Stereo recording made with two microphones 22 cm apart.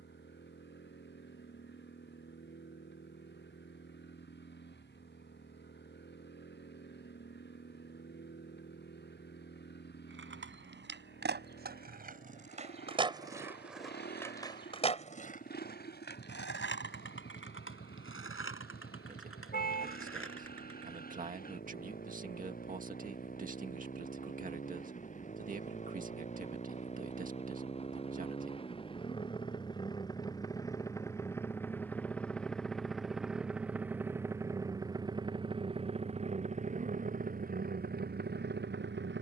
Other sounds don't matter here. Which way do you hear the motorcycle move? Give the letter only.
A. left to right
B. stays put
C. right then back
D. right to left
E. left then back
A.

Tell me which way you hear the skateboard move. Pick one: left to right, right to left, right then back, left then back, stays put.
right to left.